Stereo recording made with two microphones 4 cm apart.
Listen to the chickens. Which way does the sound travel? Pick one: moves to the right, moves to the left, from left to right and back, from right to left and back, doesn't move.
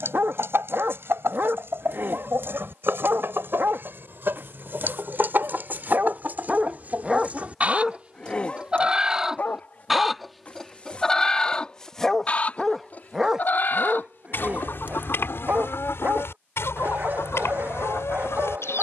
moves to the left.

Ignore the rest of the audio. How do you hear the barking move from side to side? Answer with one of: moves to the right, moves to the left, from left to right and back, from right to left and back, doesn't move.
from right to left and back.